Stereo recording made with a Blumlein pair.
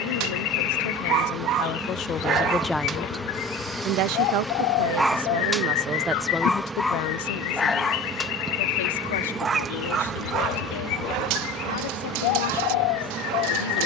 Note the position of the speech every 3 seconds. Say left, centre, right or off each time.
left, right, left, left, left.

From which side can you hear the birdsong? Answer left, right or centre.
left.